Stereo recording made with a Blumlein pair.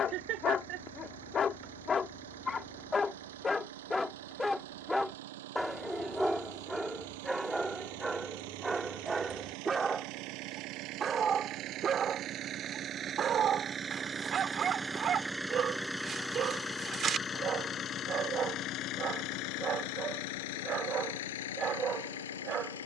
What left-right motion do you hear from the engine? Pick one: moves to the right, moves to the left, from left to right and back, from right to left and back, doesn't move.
moves to the left.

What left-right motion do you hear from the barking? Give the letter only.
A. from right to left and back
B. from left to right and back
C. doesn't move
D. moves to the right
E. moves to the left
D.